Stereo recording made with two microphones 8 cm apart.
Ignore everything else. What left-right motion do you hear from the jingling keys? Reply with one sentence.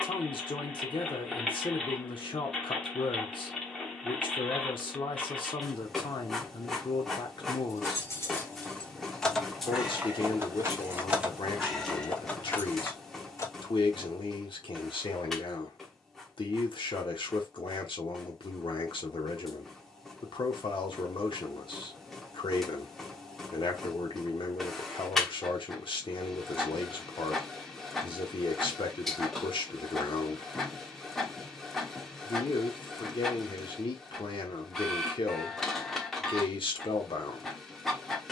In this clip you hear the jingling keys go right and come back.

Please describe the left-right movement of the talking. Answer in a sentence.
You can hear the talking stay in one place.